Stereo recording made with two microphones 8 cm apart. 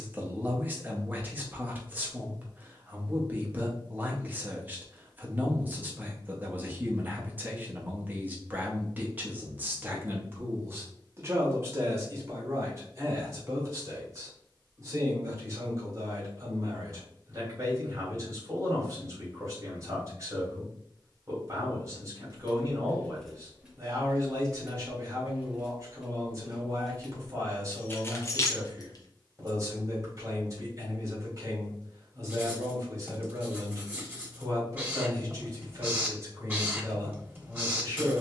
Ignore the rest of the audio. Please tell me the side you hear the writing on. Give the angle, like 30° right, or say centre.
20° right.